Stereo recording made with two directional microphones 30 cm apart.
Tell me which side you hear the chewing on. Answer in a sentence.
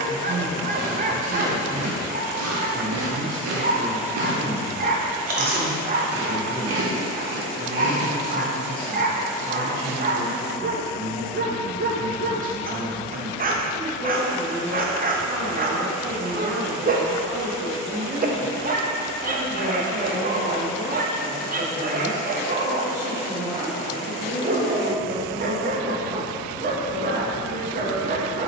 You can hear the chewing on the right.